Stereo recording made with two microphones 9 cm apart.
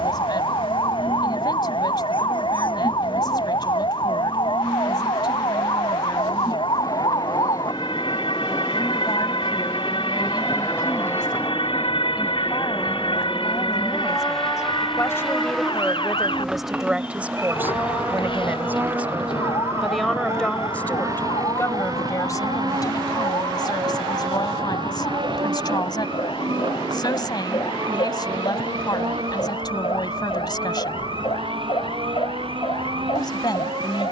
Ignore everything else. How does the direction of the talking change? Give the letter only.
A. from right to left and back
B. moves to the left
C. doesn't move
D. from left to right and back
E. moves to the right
D.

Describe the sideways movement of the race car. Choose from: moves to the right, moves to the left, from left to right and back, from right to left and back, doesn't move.
moves to the right.